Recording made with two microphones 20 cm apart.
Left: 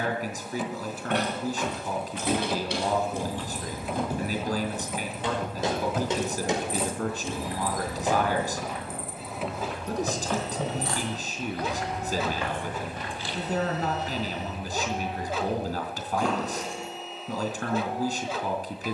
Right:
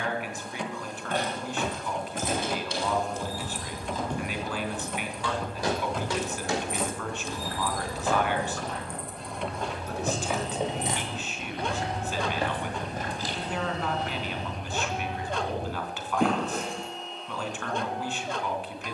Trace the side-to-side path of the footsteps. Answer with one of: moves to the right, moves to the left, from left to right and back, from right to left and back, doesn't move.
from right to left and back.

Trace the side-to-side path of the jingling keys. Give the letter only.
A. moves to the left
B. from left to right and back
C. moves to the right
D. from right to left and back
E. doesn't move
C.